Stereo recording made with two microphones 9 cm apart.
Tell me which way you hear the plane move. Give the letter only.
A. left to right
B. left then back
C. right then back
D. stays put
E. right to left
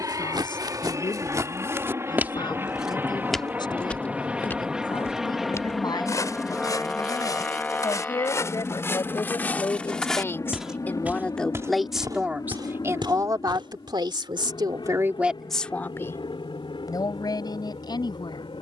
E.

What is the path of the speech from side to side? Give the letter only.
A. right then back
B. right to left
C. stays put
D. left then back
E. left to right
A.